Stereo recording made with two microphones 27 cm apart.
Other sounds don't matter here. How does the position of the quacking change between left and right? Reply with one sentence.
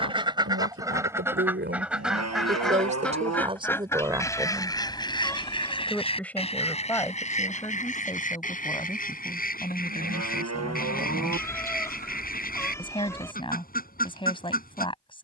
In this clip you hear the quacking move from right to left.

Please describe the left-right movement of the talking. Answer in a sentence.
You can hear the talking move to the left.